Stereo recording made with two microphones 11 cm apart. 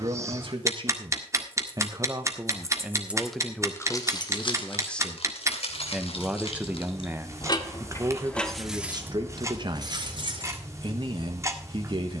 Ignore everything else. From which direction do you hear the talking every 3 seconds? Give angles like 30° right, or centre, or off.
40° right, 10° left, 20° right, 50° right.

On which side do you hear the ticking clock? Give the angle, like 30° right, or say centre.
30° right.